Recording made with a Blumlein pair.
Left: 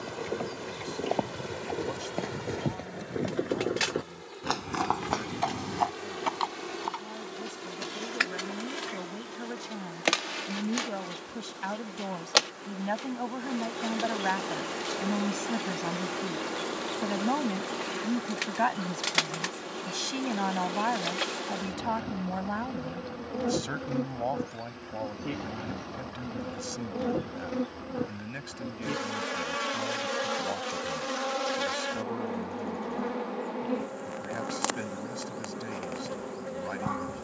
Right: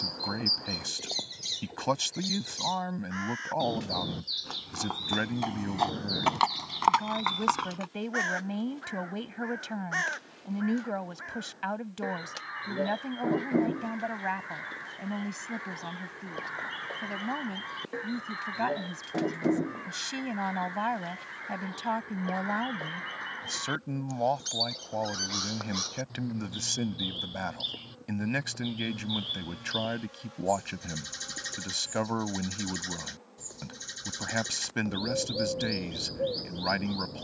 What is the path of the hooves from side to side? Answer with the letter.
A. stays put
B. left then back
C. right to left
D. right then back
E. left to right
E.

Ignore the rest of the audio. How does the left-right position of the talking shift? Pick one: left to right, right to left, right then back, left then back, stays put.
left then back.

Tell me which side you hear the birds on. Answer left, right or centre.
right.